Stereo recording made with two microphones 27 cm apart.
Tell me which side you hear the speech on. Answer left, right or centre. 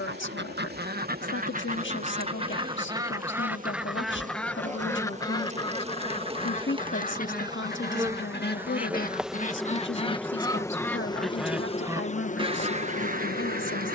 left.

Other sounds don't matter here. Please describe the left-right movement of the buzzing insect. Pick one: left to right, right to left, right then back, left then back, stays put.
right to left.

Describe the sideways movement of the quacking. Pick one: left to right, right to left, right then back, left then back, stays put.
left then back.